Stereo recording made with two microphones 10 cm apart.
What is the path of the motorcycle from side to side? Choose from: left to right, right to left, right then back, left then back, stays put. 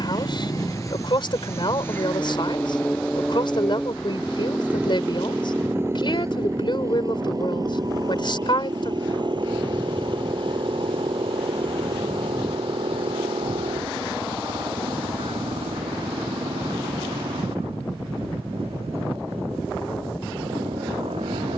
left to right.